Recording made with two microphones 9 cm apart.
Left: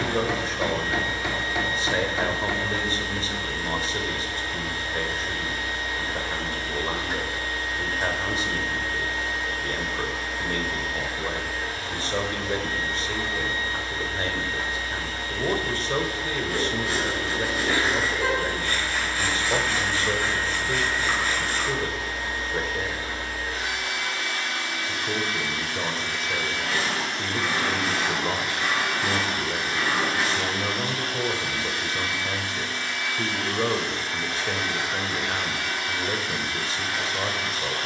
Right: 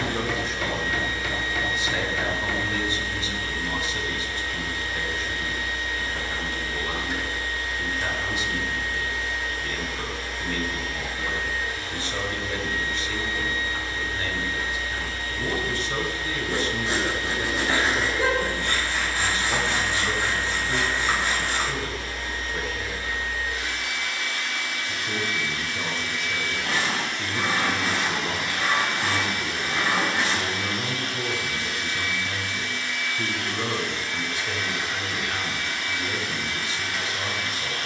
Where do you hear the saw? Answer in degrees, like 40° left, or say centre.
20° right.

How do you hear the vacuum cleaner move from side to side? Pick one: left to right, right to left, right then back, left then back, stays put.
stays put.